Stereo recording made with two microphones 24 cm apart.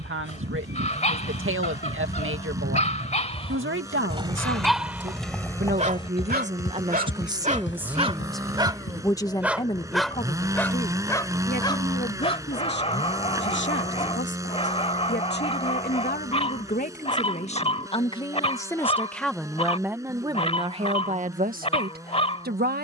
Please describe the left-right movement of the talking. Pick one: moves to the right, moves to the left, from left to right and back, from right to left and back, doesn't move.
from right to left and back.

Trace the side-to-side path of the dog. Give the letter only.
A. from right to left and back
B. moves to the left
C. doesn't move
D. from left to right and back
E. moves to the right
D.